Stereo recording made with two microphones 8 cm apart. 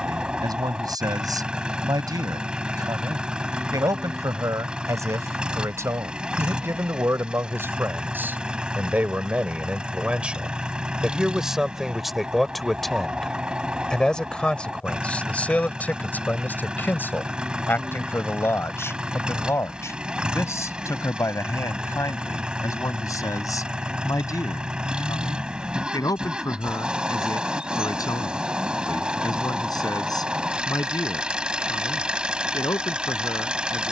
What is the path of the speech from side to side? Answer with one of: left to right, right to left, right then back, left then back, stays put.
right to left.